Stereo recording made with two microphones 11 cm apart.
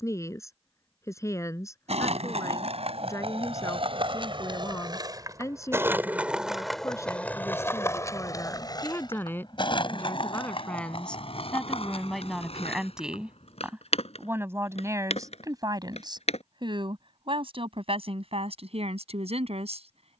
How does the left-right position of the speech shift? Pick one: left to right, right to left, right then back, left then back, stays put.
left to right.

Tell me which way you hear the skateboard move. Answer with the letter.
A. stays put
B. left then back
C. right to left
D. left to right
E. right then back
C.